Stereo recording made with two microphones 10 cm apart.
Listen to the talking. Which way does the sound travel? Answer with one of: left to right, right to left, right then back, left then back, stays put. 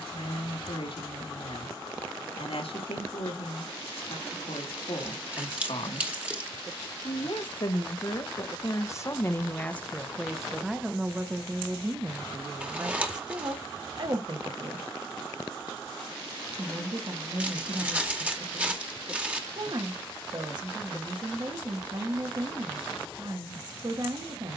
left to right.